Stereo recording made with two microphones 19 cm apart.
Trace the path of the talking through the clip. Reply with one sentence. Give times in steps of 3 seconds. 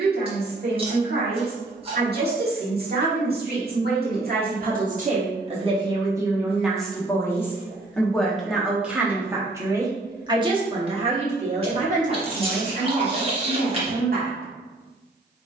You can hear the talking on the right from 0 s, in the centre from 6 s and on the right from 9 s.